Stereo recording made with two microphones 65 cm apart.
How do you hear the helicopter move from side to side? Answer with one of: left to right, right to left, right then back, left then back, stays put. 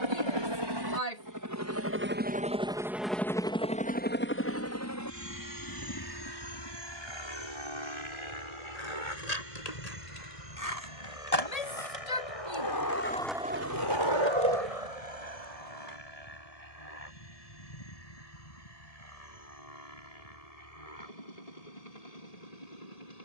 right to left.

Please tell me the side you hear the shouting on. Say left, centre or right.
left.